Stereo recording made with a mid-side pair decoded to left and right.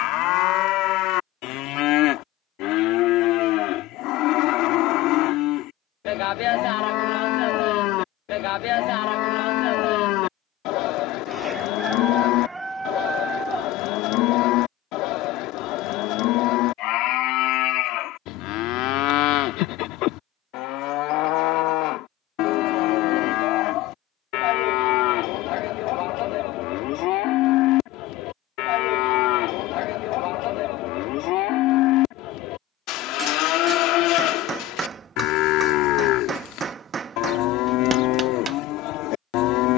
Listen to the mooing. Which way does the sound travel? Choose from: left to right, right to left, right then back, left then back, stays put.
stays put.